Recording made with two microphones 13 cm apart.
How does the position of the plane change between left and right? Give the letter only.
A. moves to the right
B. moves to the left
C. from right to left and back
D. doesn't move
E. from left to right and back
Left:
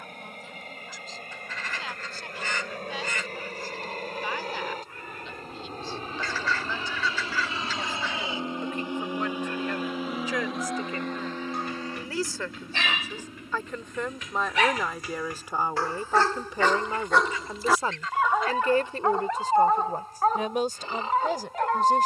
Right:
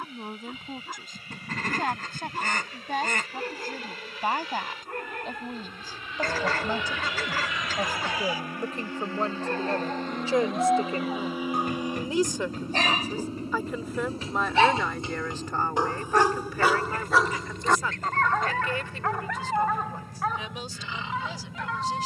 A.